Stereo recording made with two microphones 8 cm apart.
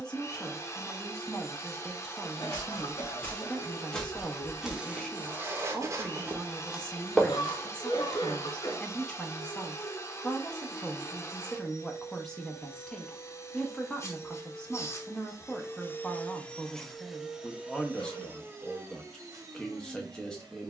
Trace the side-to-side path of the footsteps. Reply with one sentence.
In this clip you hear the footsteps move from left to right and back again.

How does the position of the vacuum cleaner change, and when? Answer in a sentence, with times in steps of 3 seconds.
You can hear the vacuum cleaner on the left from 0 s, in the centre from 15 s and on the right from 18 s.